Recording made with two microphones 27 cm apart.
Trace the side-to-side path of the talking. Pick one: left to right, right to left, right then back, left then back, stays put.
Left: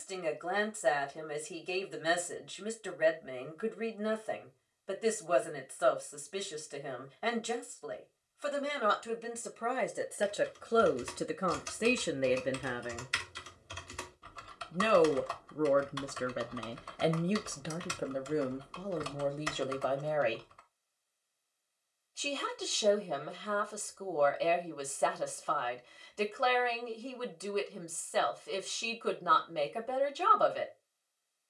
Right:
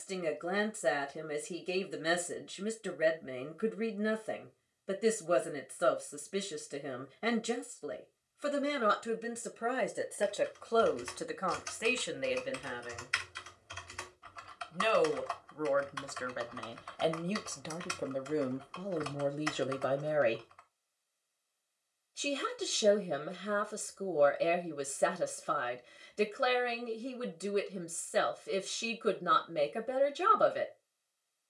left then back.